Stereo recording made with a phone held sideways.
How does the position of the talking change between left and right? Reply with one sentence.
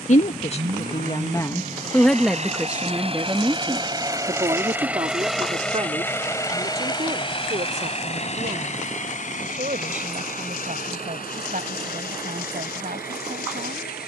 In this clip you hear the talking go from the left side to the right.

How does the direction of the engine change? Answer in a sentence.
You can hear the engine move to the left.